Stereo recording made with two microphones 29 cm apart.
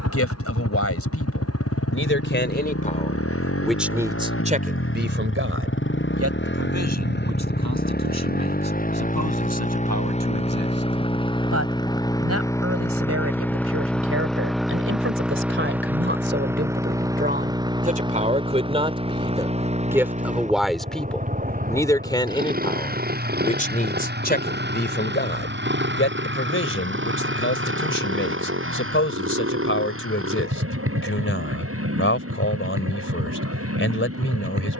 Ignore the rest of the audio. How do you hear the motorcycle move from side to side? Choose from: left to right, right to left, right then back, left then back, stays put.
left to right.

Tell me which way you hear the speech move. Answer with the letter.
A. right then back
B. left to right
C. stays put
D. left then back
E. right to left
A.